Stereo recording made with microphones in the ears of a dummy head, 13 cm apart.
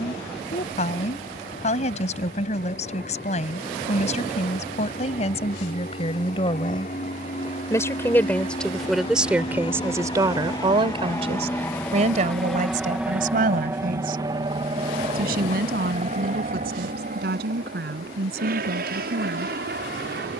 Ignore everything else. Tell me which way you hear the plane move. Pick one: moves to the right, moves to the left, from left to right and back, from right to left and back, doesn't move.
moves to the right.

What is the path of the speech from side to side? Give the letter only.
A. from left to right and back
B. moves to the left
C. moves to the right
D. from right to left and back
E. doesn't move
C.